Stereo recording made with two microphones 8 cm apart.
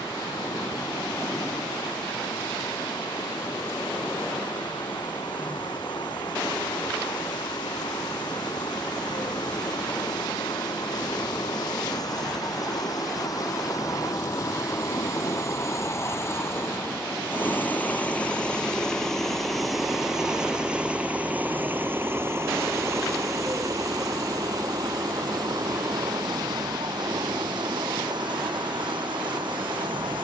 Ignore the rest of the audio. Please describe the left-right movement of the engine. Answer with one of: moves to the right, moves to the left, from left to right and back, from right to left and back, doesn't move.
moves to the right.